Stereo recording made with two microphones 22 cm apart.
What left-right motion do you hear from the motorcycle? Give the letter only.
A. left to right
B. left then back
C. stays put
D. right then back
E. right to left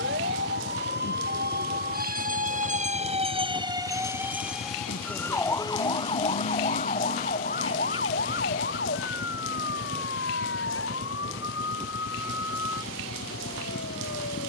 C.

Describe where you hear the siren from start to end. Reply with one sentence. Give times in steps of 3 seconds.
In this clip you hear the siren on the right from 0 s, in the centre from 3 s and on the left from 6 s.